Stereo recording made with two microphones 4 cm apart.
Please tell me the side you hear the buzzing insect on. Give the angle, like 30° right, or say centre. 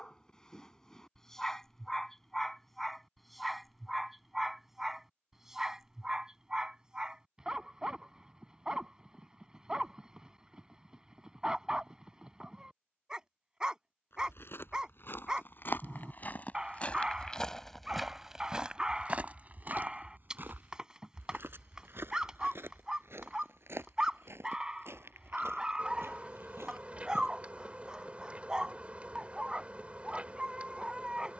30° right.